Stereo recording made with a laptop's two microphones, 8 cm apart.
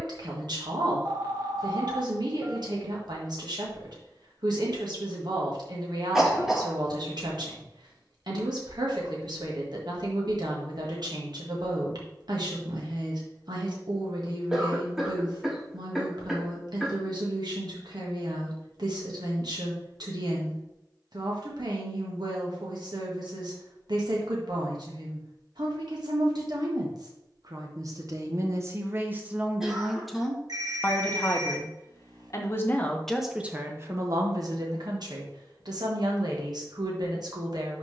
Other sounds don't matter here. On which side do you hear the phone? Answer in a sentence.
You can hear the phone on the right.